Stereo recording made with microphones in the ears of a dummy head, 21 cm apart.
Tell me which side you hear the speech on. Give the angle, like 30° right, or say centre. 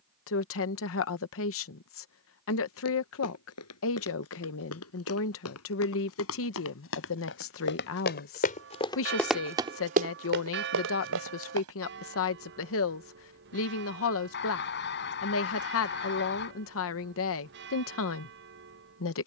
60° left.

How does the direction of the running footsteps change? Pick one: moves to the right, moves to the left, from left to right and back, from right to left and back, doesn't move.
moves to the right.